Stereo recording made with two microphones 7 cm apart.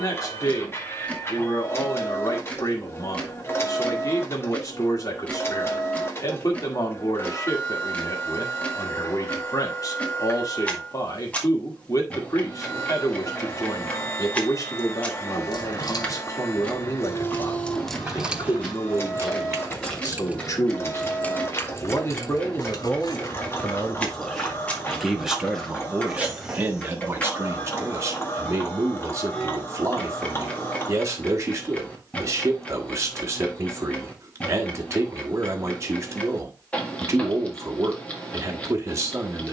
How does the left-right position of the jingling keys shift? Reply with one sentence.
In this clip you hear the jingling keys go right and come back.